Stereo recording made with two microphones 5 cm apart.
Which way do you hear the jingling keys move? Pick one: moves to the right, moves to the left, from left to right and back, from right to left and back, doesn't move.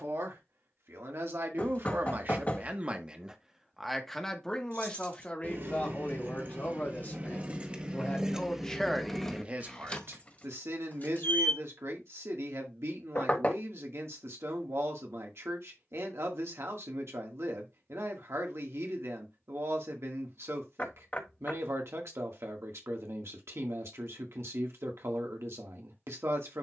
moves to the left.